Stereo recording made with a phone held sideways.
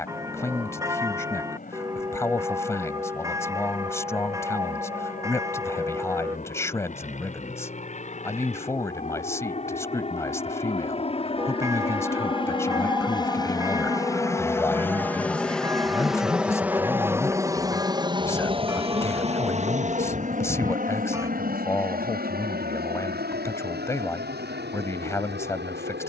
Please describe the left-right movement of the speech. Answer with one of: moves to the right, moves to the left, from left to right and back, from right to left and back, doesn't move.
doesn't move.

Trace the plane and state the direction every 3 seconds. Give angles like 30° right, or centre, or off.
60° left, 60° left, 50° left, 40° left, 20° left, 10° right, 40° right, 60° right, 70° right.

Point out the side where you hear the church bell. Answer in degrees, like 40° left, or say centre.
20° right.